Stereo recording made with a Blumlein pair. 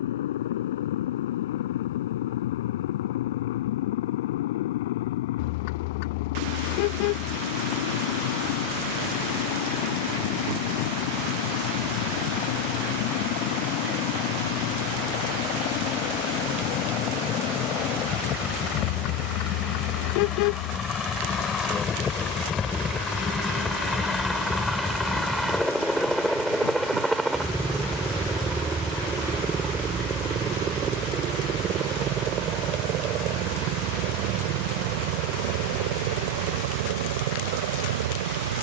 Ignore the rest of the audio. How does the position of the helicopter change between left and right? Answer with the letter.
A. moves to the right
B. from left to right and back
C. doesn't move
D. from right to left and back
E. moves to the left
A.